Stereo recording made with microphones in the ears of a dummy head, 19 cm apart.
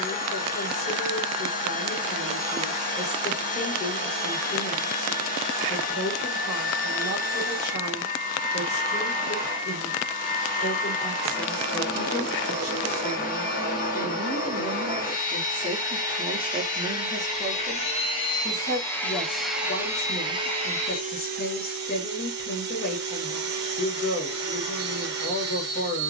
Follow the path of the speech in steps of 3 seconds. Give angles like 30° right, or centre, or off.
50° left, 50° left, 50° left, 40° left, 20° left, 10° left, 40° left, 40° left, 40° left.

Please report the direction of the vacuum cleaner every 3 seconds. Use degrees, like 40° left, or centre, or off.
40° left, 40° left, 40° left, 40° left, 40° left, 30° left, centre, 40° right, 50° right.